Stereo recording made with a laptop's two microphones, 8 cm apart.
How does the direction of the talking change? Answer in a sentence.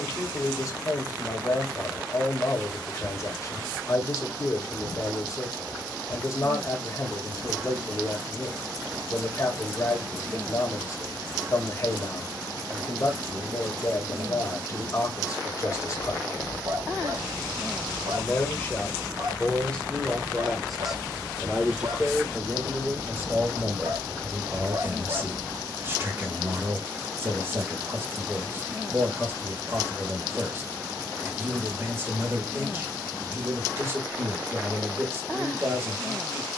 You can hear the talking go from the left side to the right.